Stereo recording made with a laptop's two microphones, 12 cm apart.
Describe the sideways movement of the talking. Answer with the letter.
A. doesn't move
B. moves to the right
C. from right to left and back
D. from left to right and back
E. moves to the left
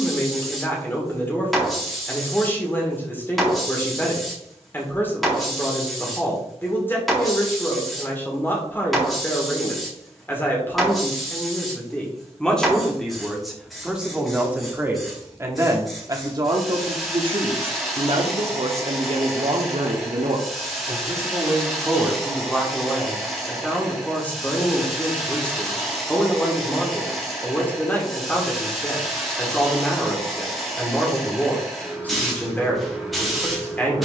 D.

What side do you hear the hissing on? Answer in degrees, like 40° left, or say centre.
centre.